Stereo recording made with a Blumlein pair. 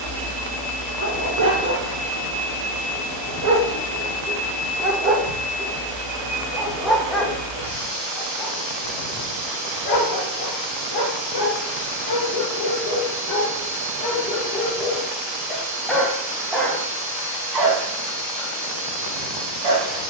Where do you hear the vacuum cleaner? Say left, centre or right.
right.